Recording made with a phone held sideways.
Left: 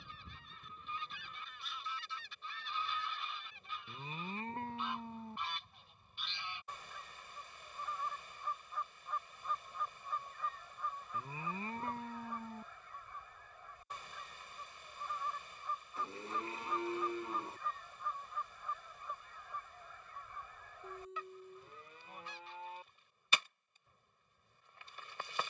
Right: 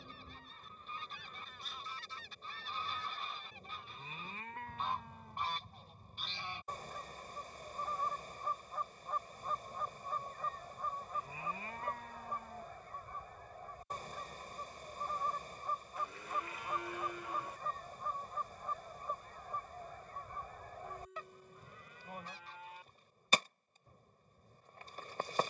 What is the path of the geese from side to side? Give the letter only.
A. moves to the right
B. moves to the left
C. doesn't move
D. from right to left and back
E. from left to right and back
C.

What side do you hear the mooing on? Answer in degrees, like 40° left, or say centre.
30° left.